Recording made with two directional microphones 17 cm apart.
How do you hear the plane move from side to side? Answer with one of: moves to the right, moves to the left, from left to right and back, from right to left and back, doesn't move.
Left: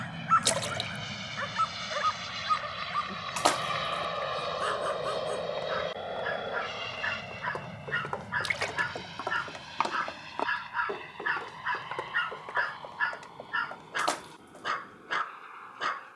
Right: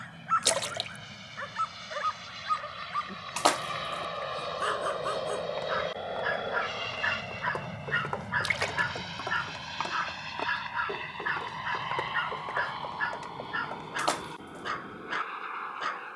moves to the right.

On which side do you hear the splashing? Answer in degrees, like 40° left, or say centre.
10° right.